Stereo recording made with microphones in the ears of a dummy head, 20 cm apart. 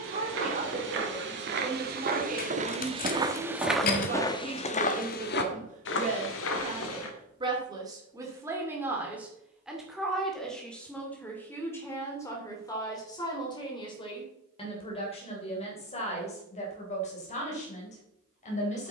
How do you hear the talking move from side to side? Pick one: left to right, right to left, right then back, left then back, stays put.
right to left.